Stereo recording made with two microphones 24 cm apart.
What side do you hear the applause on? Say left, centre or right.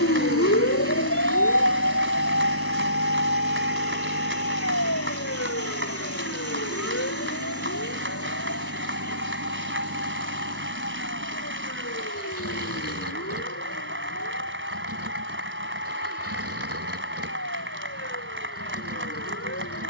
right.